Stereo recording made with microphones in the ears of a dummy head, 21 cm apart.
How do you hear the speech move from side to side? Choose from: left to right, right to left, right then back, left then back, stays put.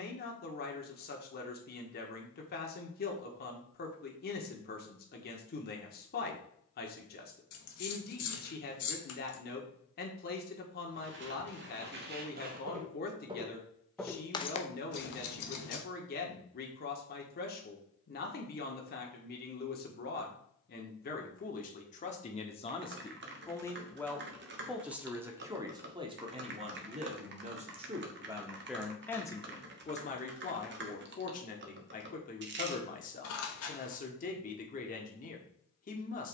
right then back.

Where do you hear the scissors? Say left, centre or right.
left.